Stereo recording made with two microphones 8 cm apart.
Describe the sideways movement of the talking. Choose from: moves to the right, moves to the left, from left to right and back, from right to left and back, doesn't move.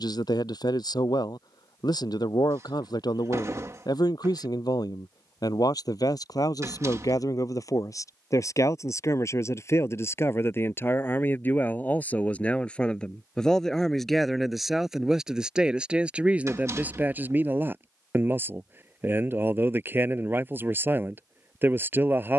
moves to the right.